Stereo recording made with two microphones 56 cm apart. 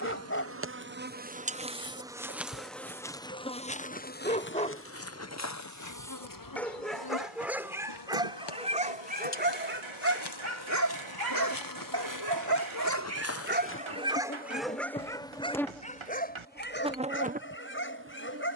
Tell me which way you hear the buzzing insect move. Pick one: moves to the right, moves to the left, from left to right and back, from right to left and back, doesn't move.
from right to left and back.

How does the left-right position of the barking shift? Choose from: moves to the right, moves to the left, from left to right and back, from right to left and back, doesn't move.
from left to right and back.